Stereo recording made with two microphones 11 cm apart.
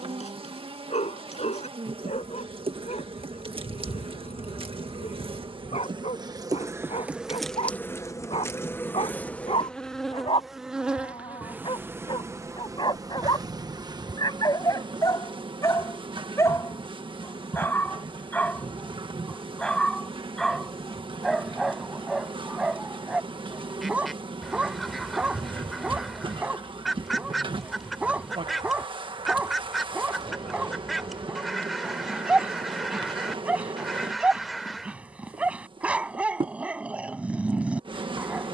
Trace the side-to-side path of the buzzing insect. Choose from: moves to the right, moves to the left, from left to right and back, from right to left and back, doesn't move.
from right to left and back.